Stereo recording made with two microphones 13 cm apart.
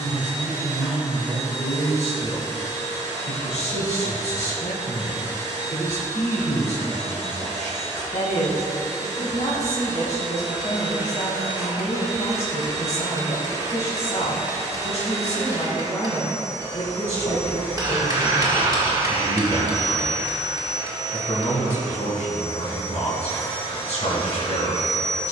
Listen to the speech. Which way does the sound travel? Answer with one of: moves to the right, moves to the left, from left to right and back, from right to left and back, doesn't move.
doesn't move.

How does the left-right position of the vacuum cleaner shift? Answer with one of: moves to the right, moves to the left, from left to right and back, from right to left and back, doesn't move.
doesn't move.